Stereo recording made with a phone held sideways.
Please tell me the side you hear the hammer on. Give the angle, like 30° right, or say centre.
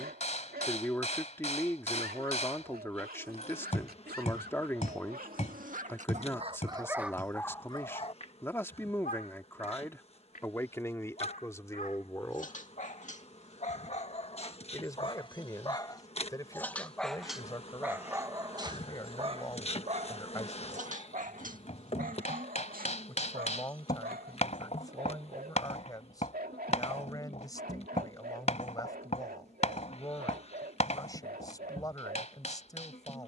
50° left.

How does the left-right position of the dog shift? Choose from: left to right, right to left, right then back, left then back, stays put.
left then back.